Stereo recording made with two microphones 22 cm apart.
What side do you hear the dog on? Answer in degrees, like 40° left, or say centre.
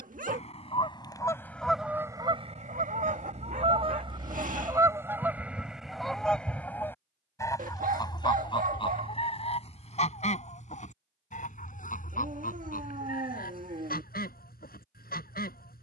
40° right.